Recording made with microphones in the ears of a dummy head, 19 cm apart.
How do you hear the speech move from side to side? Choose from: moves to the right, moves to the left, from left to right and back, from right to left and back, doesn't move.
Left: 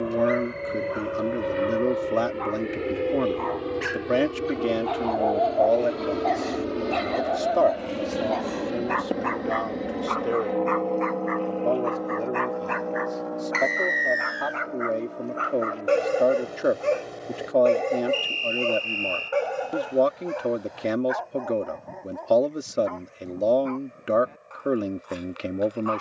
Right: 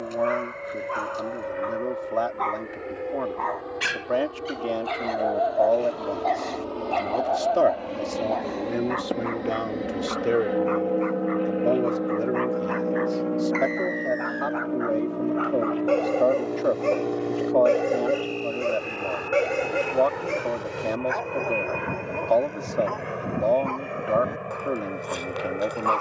from left to right and back.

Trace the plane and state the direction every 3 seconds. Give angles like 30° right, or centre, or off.
50° left, 40° left, 20° left, 10° right, 30° right, 50° right, 60° right, 70° right, 80° right.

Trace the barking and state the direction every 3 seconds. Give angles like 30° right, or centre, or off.
60° right, 30° right, 30° left, 60° left, 40° left, 10° left, 30° right, 50° right, 60° right.